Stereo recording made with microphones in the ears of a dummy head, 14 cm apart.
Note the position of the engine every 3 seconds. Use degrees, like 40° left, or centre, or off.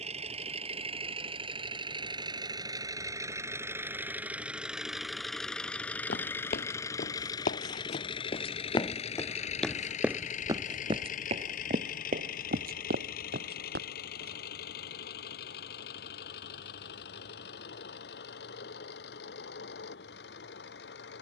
30° right, 10° right, 30° left, 50° left, 70° left, 70° left, 80° left.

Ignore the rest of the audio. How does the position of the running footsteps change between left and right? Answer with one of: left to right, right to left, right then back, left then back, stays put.
left to right.